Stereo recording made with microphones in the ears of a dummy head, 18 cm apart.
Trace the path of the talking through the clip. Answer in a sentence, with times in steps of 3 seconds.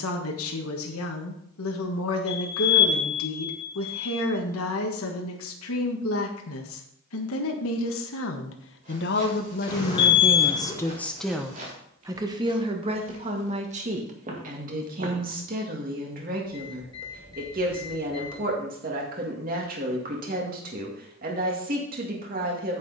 You can hear the talking on the left from 0 s and on the right from 12 s.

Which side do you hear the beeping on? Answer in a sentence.
You can hear the beeping on the left.